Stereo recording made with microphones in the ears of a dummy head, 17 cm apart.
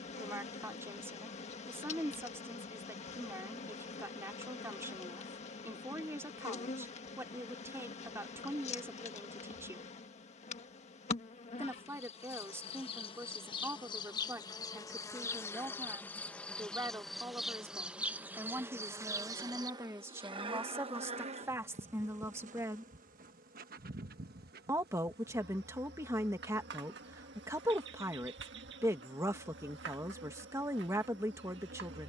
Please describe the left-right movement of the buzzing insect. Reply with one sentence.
In this clip you hear the buzzing insect go from the left side to the right.